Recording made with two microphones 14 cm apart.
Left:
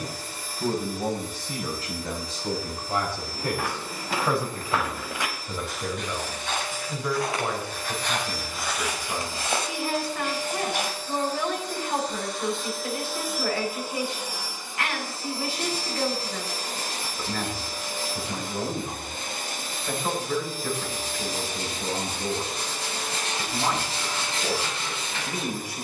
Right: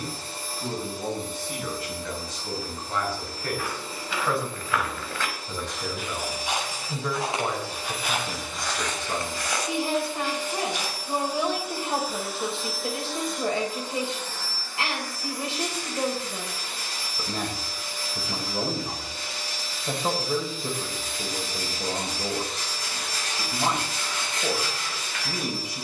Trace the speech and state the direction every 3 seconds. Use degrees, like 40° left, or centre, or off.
30° left, 20° left, 10° right, 20° right, 20° right, 20° right, 20° right, 20° right, 20° right.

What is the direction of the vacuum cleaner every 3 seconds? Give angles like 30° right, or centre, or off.
30° right, 30° right, 30° right, 10° right, 10° left, 40° left, 50° left, 50° left, 50° left.